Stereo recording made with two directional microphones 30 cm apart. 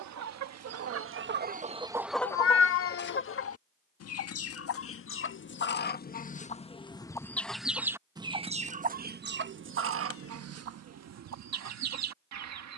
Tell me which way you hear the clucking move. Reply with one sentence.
You can hear the clucking move from right to left and back again.